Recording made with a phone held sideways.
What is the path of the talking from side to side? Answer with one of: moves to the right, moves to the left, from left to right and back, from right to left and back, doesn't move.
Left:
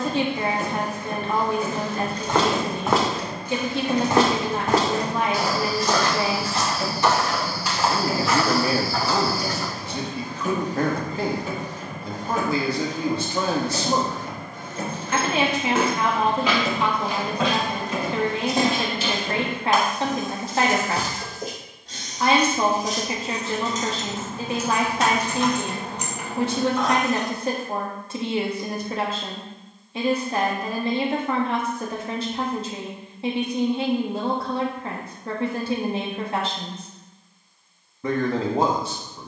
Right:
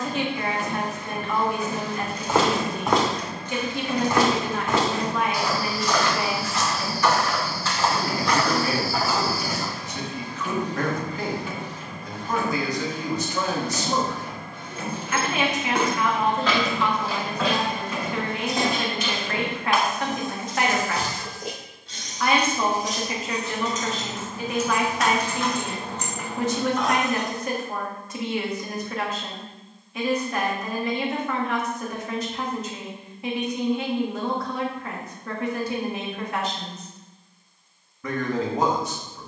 doesn't move.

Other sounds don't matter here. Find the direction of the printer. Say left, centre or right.
left.